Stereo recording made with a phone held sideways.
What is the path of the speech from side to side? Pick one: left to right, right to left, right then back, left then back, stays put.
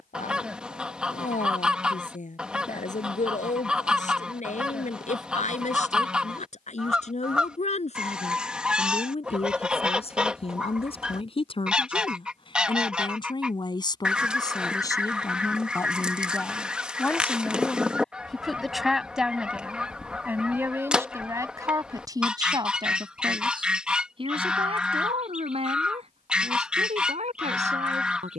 left to right.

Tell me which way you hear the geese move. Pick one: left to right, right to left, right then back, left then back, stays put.
stays put.